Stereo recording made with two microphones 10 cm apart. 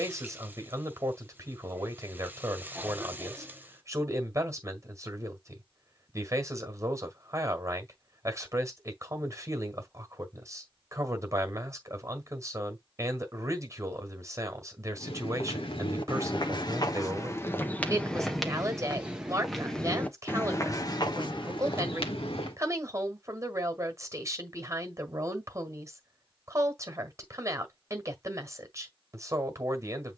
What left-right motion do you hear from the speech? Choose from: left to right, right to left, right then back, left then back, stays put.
stays put.